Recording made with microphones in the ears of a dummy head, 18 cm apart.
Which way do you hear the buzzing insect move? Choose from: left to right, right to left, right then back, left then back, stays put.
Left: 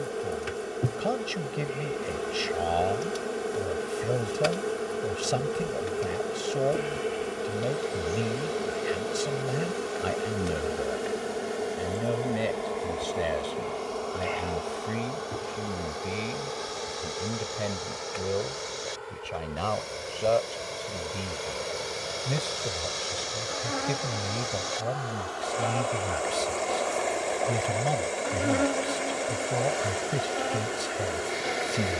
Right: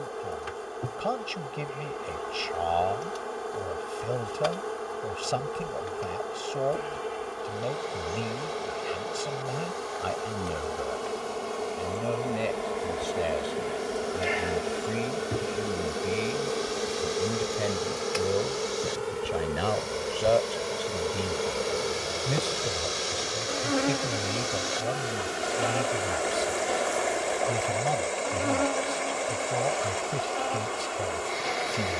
right then back.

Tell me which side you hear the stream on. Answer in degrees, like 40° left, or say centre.
centre.